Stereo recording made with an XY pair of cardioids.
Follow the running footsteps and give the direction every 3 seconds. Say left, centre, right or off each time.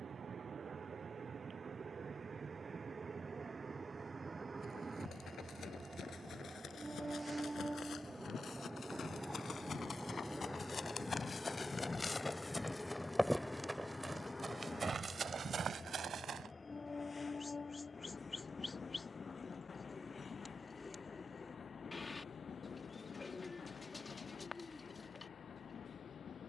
off, left, left, left, centre, right, off, off, off.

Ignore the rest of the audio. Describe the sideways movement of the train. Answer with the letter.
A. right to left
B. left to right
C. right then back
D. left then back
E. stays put
A.